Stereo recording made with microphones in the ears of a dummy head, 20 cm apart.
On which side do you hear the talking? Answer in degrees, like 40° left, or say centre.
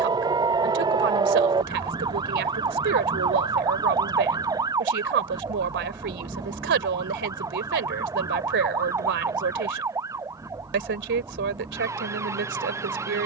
50° right.